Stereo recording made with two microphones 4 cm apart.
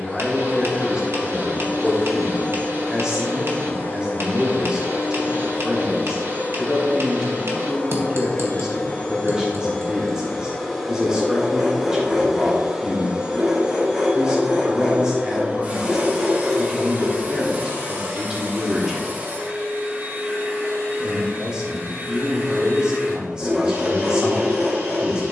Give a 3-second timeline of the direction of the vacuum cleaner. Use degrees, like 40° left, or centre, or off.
40° left, 40° left, 30° left, 10° left, 20° right, 40° right, 50° right, 60° right, 60° right.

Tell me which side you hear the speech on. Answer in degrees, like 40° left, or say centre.
20° right.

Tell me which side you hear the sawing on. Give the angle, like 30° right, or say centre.
10° right.